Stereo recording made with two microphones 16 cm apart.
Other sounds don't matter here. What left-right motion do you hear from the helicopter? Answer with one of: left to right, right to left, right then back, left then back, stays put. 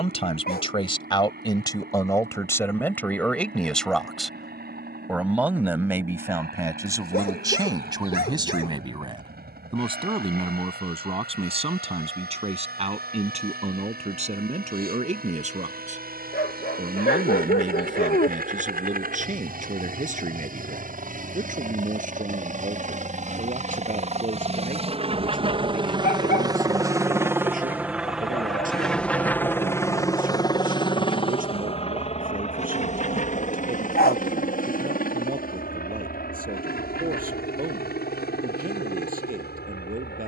right to left.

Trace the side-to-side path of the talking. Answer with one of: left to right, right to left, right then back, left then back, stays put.
left to right.